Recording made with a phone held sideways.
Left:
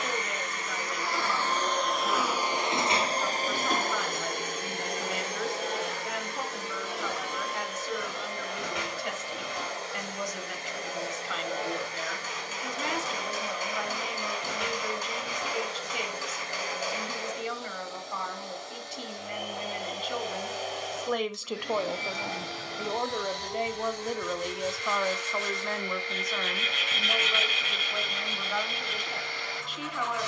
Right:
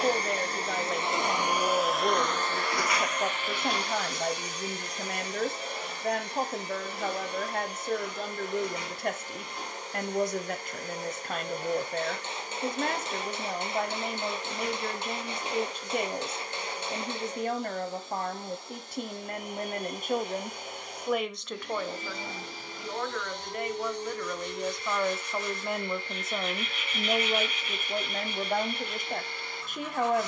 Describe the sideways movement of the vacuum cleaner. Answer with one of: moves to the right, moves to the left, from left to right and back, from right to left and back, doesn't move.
moves to the left.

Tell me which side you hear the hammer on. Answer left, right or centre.
right.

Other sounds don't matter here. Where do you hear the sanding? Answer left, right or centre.
left.